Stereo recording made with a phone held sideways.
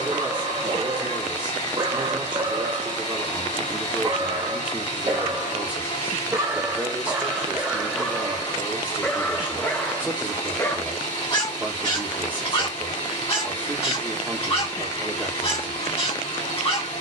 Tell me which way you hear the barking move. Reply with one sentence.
You can hear the barking go from the right side to the left.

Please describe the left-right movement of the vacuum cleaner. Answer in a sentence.
In this clip you hear the vacuum cleaner stay put.